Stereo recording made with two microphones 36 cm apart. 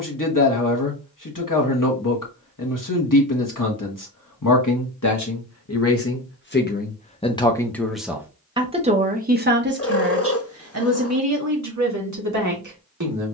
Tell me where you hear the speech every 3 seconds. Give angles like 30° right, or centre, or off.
60° left, 50° left, 10° left, 40° right, 50° right.